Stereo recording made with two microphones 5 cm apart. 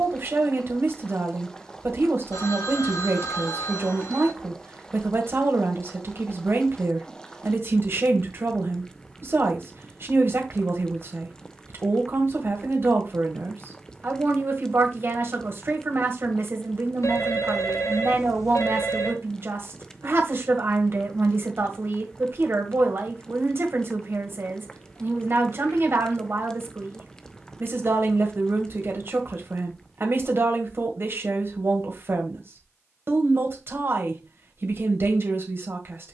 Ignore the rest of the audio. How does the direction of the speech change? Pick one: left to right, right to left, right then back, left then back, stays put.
stays put.